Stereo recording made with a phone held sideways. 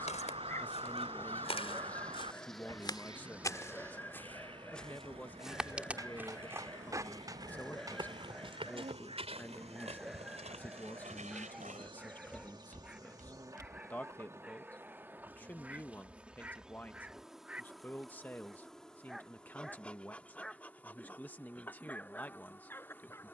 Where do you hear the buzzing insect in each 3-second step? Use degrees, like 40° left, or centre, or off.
10° left, 20° right, 50° right, 40° right, 20° right, 10° right, 10° left, 10° left.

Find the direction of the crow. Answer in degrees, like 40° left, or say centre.
40° right.